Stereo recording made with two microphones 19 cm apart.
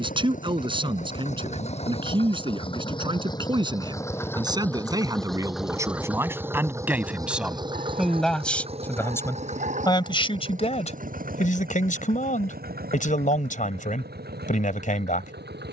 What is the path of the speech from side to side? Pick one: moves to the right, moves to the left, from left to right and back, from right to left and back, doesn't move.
moves to the left.